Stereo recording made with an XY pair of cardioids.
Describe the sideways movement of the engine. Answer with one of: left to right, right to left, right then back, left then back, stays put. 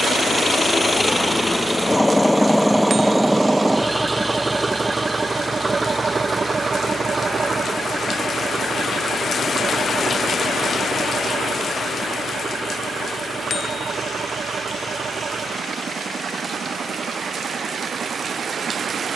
left to right.